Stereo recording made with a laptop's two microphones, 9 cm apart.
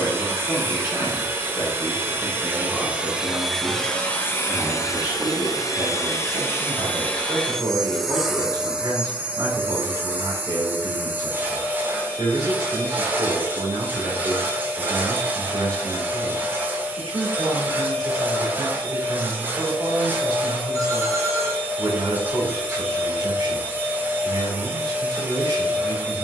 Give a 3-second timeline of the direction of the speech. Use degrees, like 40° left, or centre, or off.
30° left, 10° right, 40° right, 40° right, 40° right, 40° right, 40° right, 40° right, 40° right.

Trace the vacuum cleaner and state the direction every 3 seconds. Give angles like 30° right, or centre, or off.
20° right, 20° left, 10° left, 20° right, 20° right, 20° right, 20° right, 20° right, 20° right.